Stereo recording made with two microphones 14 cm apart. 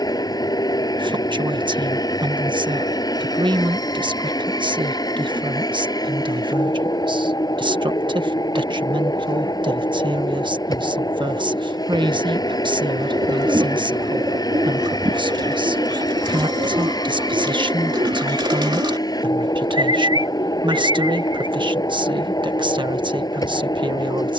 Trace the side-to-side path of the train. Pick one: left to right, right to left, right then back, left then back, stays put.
stays put.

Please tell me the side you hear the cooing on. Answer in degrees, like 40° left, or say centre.
30° right.